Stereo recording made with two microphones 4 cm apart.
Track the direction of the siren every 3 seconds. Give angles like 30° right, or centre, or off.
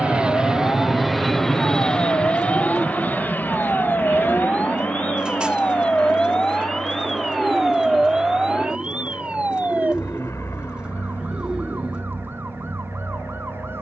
60° left, 30° left, centre, 40° right, 60° right.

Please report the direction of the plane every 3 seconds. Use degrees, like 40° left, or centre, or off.
10° left, 50° left, 60° left, 70° left, 70° left.